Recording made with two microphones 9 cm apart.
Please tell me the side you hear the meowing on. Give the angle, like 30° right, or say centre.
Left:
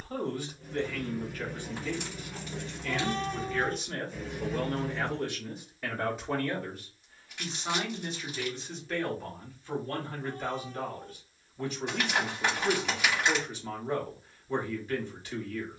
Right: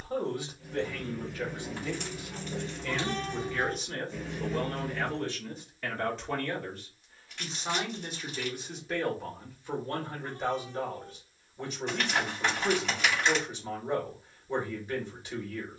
40° left.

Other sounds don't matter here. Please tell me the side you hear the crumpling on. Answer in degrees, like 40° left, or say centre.
10° left.